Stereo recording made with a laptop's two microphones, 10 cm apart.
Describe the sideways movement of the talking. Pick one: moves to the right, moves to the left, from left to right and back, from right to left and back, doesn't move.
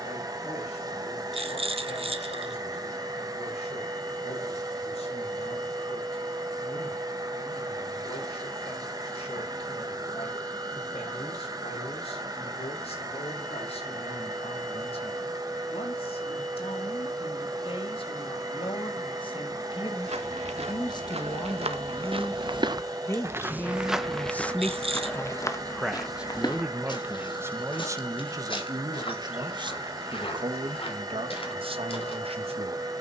moves to the right.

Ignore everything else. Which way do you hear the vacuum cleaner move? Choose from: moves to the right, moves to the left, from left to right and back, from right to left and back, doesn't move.
doesn't move.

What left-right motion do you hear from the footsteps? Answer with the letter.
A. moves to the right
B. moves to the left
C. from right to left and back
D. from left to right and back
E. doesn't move
B.